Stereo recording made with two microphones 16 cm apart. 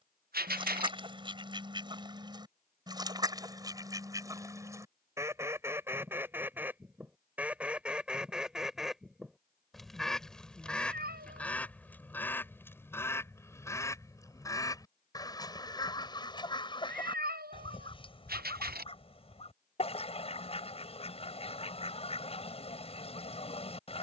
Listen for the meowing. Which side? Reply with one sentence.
You can hear the meowing on the right.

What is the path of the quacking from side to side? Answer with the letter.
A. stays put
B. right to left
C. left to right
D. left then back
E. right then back
B.